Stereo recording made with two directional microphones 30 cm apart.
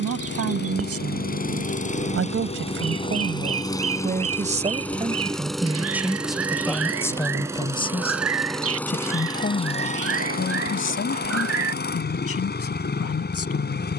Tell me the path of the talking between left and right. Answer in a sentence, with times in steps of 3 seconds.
You can hear the talking on the right from 0 s, in the centre from 6 s and on the left from 9 s.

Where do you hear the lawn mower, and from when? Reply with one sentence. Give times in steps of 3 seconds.
In this clip you hear the lawn mower on the left from 0 s, in the centre from 3 s and on the left from 9 s.